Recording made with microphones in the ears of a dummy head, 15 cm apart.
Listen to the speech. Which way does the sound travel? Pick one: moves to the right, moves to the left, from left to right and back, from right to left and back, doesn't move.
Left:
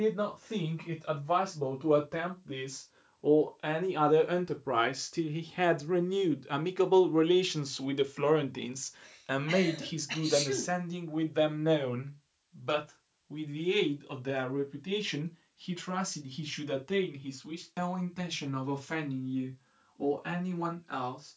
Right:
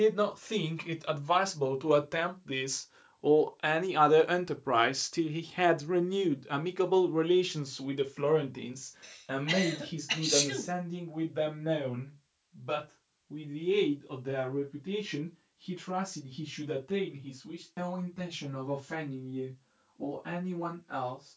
moves to the left.